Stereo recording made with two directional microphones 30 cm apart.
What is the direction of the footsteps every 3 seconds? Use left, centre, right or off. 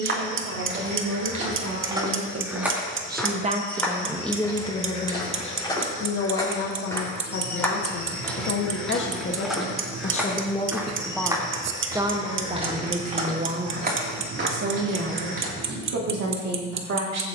right, centre, centre, centre, right, right.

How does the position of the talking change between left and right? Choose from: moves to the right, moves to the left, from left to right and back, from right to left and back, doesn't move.
from right to left and back.